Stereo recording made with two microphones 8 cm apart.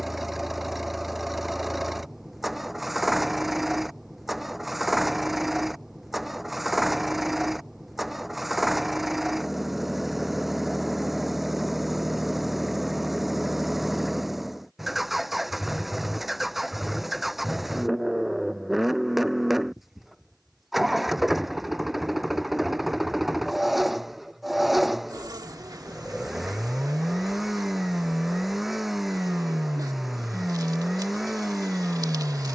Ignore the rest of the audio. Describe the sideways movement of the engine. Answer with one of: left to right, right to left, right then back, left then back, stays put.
stays put.